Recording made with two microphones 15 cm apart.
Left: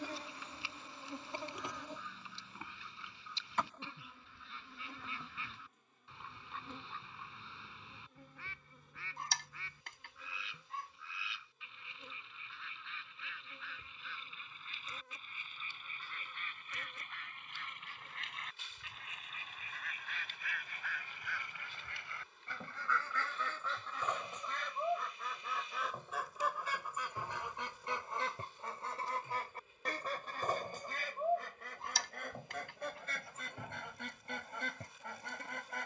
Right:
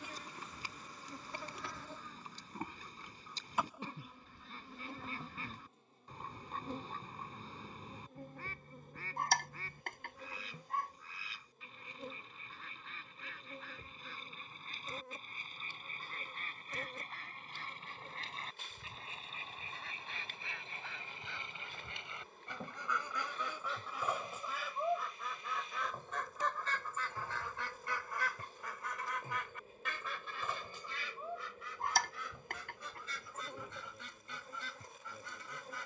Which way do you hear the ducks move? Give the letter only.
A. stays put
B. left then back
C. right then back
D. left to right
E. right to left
E.